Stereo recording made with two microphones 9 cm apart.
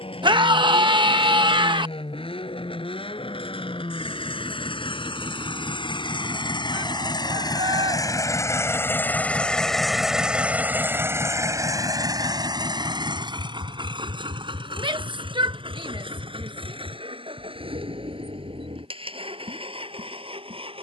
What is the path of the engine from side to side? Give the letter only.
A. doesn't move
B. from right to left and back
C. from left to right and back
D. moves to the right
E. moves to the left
D.